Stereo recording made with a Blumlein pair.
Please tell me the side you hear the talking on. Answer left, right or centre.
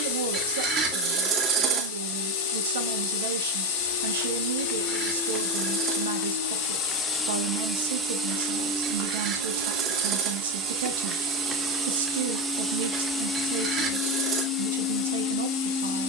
right.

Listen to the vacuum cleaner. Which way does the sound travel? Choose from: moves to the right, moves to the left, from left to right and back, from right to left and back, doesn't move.
from left to right and back.